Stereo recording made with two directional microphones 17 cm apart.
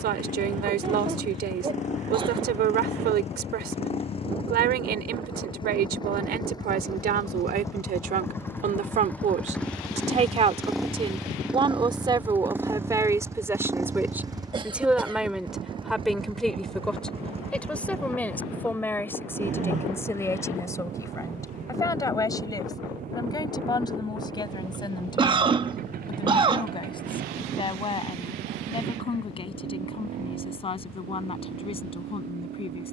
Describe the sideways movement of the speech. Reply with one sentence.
In this clip you hear the speech move to the left.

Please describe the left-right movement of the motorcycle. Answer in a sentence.
You can hear the motorcycle travel towards the right.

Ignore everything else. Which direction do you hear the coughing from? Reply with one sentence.
You can hear the coughing on the right.